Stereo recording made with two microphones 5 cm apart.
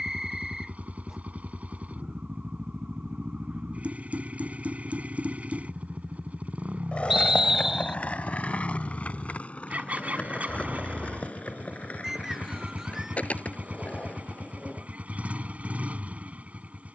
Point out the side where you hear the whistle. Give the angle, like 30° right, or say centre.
10° right.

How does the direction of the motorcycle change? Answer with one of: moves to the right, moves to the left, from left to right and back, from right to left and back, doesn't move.
doesn't move.